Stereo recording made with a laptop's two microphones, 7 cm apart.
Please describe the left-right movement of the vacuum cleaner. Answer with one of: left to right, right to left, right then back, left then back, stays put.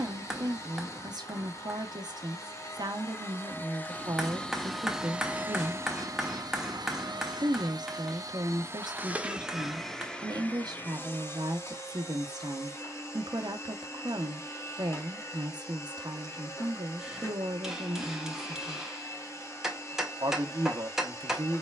right then back.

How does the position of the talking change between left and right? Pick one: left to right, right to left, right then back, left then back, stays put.
stays put.